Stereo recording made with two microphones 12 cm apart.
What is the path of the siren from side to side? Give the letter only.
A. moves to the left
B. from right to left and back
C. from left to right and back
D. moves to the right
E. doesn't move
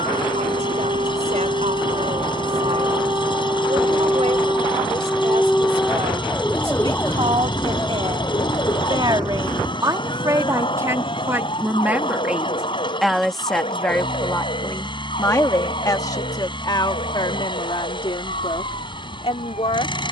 A.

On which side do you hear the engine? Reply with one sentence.
In this clip you hear the engine on the left.